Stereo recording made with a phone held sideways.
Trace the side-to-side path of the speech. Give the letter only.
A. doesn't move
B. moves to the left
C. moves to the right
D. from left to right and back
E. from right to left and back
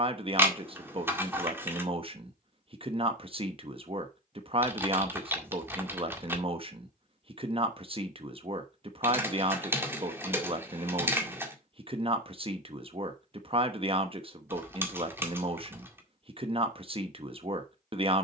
A.